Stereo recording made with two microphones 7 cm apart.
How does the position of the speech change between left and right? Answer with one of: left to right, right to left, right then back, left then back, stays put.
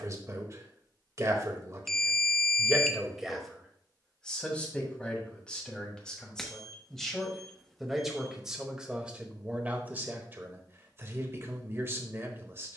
left then back.